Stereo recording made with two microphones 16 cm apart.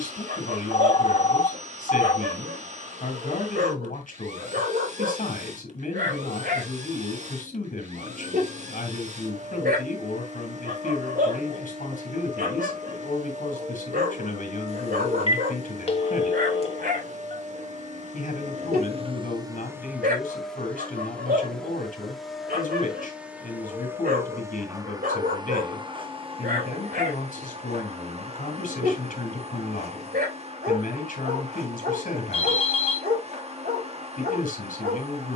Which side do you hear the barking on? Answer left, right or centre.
right.